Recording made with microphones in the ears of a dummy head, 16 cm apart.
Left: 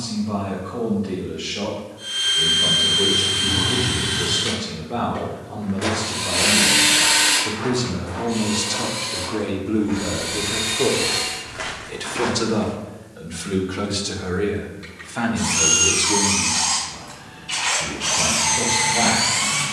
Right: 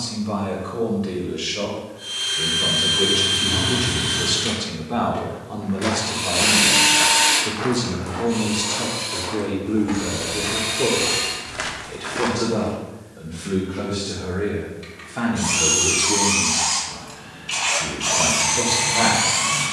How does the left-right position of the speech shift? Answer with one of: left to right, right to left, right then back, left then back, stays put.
left then back.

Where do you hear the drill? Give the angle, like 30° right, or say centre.
centre.